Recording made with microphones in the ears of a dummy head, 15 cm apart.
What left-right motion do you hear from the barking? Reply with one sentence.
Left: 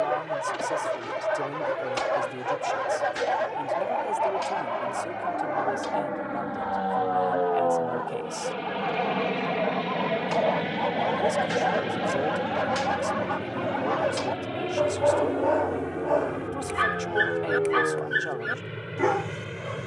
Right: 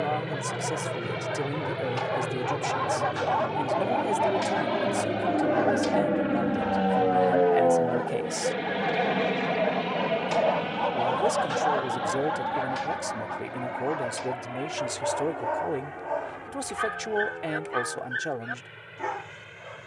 You can hear the barking move from left to right and back again.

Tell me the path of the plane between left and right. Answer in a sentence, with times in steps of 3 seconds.
You can hear the plane on the right from 0 s, in the centre from 9 s and on the left from 12 s.